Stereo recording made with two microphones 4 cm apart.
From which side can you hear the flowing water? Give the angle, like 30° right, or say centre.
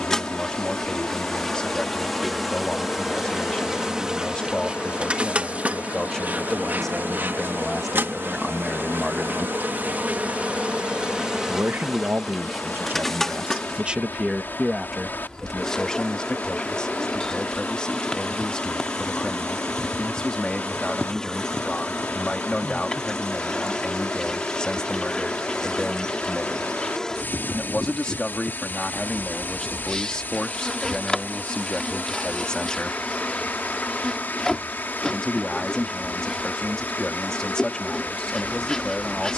50° left.